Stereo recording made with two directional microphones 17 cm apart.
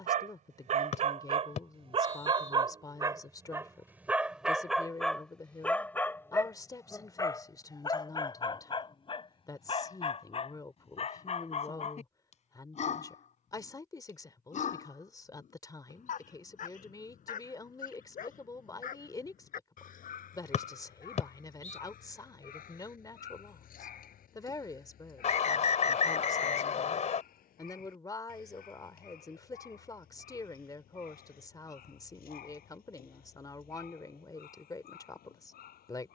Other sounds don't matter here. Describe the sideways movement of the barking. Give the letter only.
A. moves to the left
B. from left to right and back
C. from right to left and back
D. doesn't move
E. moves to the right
A.